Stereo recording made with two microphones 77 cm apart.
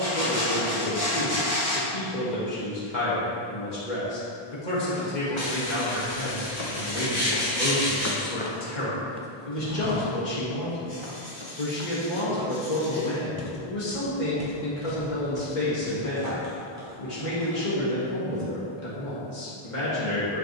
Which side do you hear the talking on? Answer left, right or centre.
left.